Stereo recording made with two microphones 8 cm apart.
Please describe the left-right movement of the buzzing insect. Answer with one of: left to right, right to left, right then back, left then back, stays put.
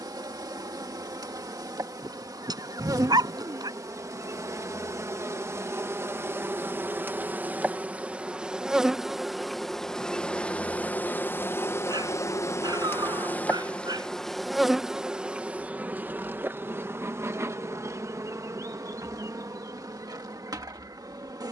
left then back.